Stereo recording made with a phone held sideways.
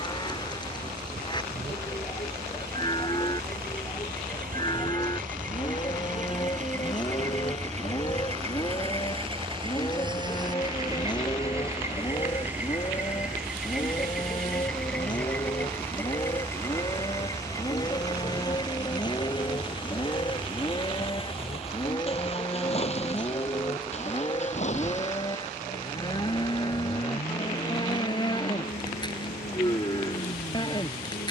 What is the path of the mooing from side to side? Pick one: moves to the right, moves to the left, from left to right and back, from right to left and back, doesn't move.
doesn't move.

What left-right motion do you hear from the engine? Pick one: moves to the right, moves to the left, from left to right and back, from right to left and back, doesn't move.
moves to the left.